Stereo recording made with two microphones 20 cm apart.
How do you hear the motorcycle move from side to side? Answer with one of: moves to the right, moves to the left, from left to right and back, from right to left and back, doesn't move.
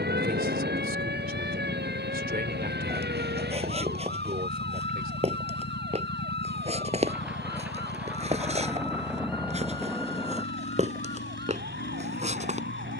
doesn't move.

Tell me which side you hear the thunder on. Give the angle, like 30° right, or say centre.
10° right.